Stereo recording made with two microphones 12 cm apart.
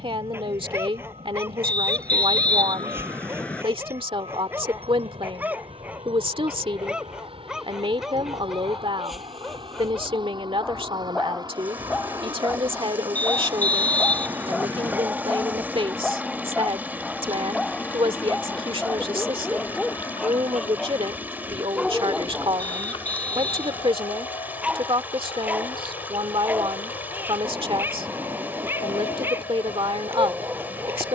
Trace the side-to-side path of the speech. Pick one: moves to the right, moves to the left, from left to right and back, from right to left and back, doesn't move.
doesn't move.